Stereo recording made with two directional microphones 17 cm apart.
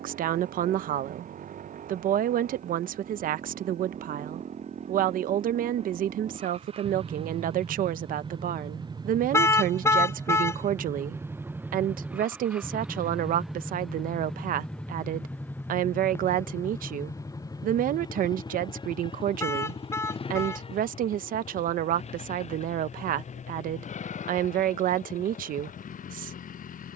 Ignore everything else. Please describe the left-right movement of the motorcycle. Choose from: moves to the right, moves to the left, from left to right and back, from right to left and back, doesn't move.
moves to the left.